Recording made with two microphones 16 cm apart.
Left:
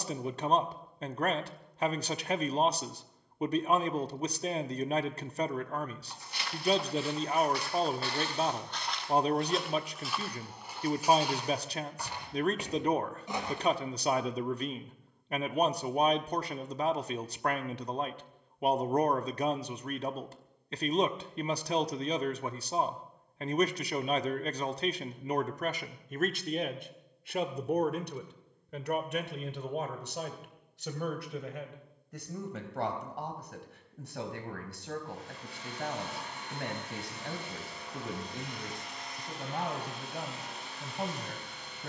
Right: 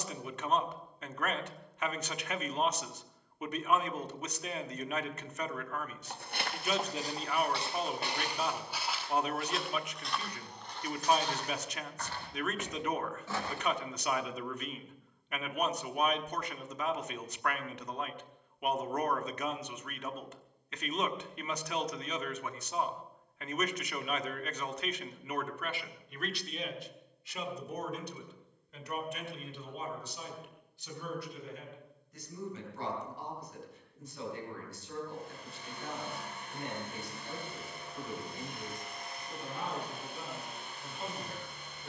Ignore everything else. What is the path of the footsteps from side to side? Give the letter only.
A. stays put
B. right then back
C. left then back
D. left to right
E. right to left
E.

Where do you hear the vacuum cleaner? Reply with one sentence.
You can hear the vacuum cleaner on the left.